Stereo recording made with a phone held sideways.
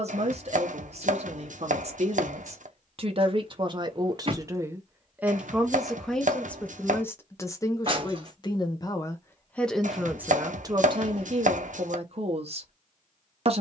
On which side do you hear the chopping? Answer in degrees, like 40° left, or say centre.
60° right.